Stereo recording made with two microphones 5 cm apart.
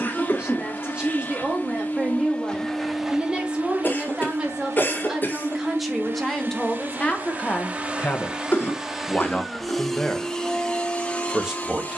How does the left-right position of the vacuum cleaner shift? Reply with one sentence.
You can hear the vacuum cleaner go right and come back.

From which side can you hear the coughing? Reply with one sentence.
You can hear the coughing on the left.